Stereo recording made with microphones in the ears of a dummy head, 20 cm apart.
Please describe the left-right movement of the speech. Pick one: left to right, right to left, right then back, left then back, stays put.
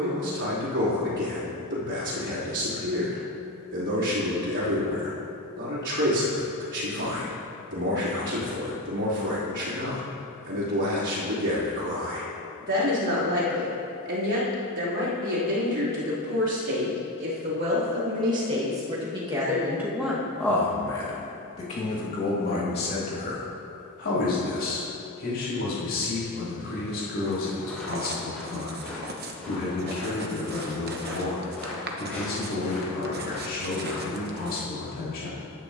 right to left.